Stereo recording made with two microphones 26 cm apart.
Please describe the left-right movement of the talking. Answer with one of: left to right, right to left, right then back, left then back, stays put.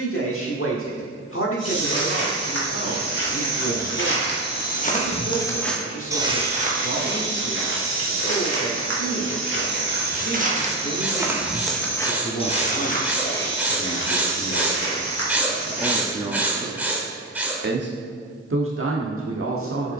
left to right.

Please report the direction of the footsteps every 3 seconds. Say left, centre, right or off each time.
left, left, right, right, left, left, off.